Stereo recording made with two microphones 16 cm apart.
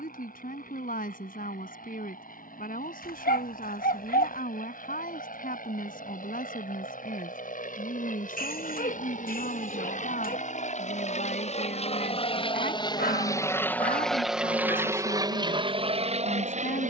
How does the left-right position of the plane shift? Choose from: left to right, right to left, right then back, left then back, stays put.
left to right.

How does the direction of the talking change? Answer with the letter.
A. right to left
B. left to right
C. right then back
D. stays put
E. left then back
D.